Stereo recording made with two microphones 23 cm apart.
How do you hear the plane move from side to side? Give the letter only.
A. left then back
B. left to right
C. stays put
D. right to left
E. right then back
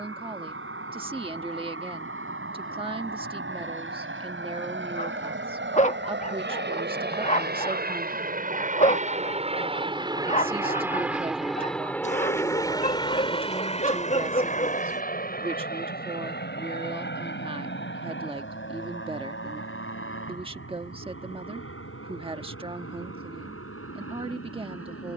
D.